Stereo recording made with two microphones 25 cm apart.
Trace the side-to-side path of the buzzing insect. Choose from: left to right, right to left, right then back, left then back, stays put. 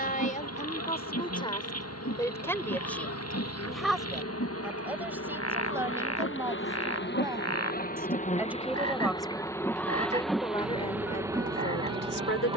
left to right.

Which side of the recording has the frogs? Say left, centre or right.
left.